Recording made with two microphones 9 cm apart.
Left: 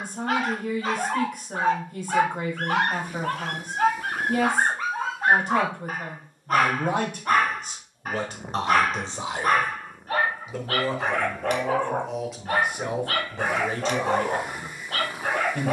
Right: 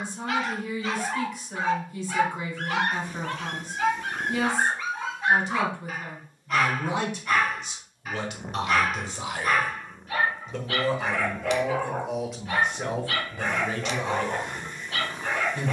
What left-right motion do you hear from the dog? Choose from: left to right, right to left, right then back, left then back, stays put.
stays put.